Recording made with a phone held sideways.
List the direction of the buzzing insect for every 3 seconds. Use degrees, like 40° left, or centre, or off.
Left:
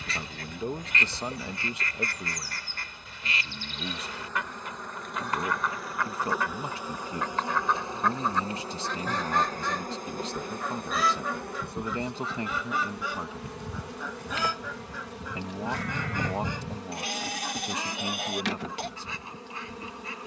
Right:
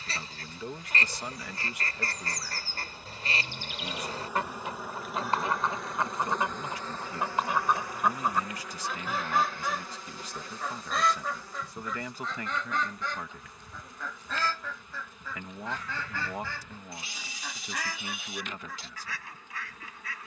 30° left, 10° right, 20° left, 50° left, 80° left, 80° left, 80° left.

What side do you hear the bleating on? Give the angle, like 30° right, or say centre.
70° left.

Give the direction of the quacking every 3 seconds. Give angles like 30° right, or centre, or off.
40° right, 30° right, 20° right, centre, 10° left, 20° left, 20° left.